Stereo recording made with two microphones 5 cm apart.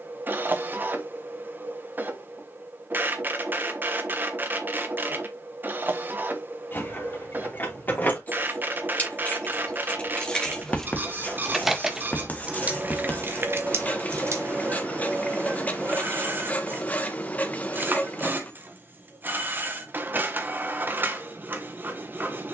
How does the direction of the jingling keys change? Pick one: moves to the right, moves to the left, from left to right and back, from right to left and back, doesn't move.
moves to the right.